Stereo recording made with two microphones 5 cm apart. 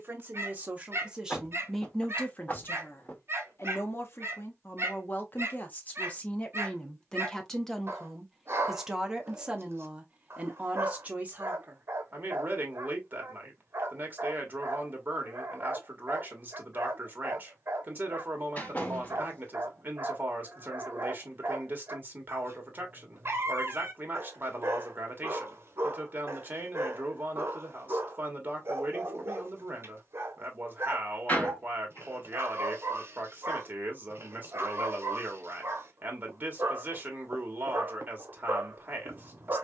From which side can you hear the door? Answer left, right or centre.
left.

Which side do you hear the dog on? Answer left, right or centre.
right.